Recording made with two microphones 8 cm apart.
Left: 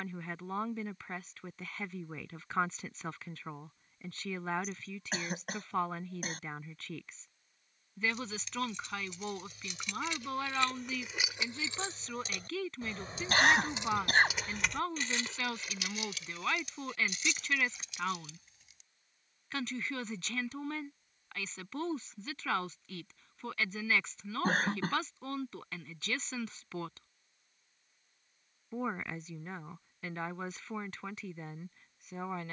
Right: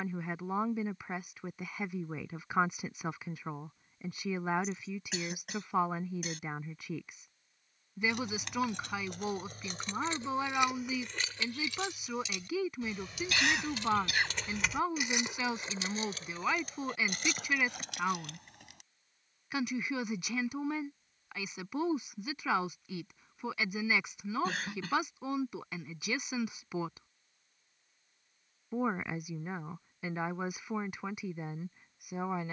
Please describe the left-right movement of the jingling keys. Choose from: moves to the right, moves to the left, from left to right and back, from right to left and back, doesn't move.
from right to left and back.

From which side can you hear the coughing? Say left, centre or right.
left.